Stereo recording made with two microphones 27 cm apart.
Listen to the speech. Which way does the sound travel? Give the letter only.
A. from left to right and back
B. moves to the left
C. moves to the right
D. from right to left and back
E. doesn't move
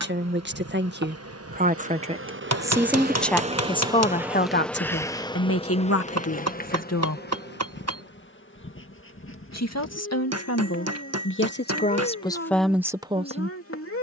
D.